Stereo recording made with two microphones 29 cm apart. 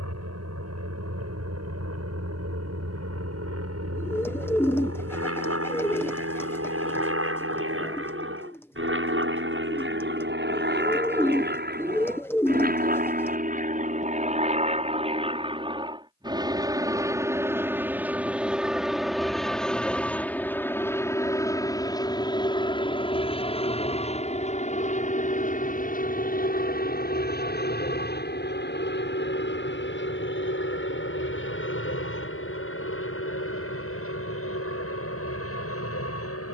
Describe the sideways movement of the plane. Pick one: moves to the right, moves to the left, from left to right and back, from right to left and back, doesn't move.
moves to the left.